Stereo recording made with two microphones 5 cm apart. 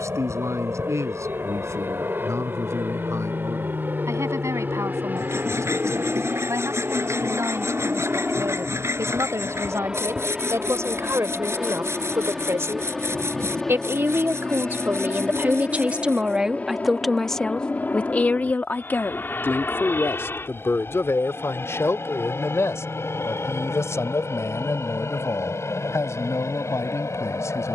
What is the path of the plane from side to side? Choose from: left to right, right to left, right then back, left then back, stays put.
right to left.